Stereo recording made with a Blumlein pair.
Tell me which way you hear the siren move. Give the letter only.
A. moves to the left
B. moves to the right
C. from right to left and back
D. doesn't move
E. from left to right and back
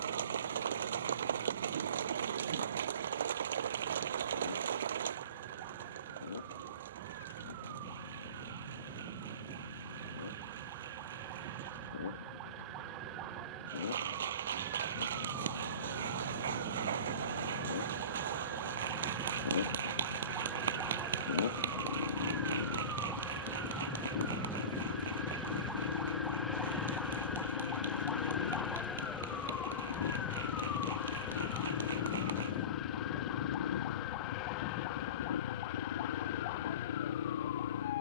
A.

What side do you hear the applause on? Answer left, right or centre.
right.